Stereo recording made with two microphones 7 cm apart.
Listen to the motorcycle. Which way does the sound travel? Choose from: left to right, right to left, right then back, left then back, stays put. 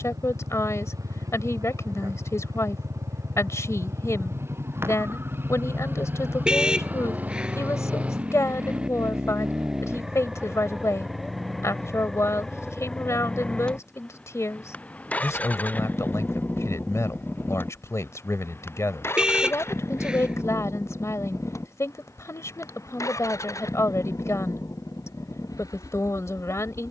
right to left.